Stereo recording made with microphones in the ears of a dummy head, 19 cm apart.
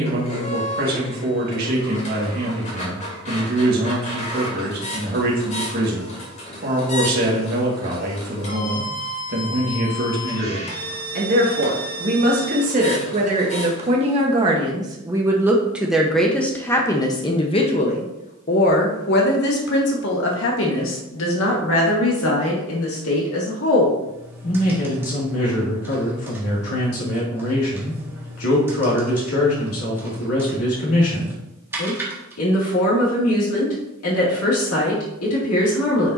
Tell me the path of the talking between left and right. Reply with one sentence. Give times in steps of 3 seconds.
In this clip you hear the talking on the right from 0 s, in the centre from 15 s and on the left from 18 s.